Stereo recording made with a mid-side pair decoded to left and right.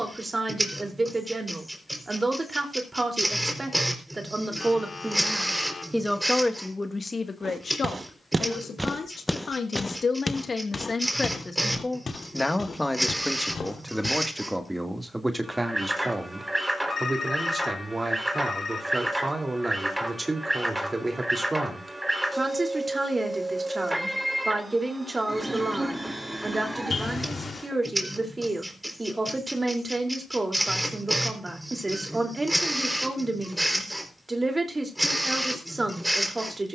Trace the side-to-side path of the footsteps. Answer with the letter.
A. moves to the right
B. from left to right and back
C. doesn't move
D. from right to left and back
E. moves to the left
E.